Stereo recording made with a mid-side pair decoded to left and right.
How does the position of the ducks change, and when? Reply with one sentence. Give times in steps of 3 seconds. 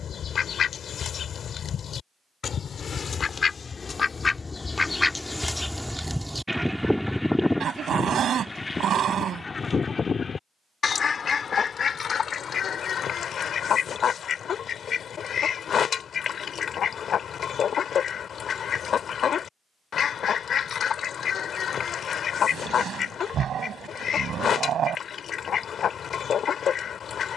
In this clip you hear the ducks on the left from 0 s, in the centre from 6 s and on the left from 9 s.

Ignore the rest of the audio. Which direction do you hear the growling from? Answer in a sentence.
You can hear the growling on the right.